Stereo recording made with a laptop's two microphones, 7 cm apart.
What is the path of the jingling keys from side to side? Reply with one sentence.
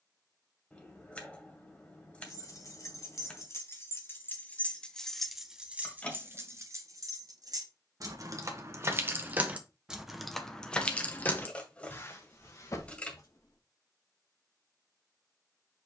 In this clip you hear the jingling keys go right and come back.